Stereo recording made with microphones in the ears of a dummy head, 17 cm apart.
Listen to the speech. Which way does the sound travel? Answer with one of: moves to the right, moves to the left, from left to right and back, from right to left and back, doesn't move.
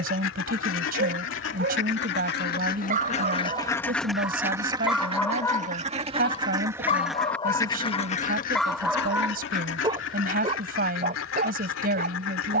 doesn't move.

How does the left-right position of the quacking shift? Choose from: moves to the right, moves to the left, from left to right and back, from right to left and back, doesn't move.
from left to right and back.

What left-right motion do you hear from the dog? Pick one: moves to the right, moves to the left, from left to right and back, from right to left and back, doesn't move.
from right to left and back.